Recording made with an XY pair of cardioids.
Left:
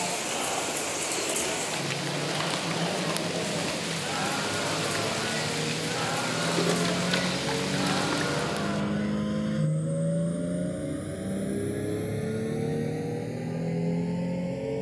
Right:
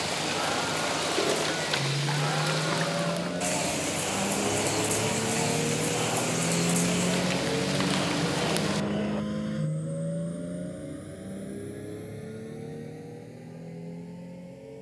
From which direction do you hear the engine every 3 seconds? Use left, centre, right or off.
right, right, centre, left, left.